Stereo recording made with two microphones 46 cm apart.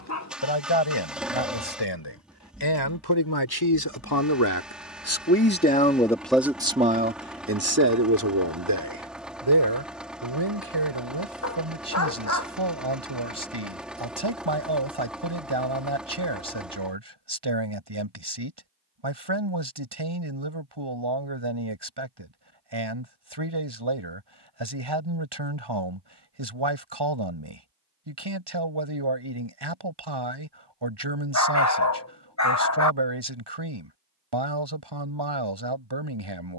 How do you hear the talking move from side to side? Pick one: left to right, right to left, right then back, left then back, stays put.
left to right.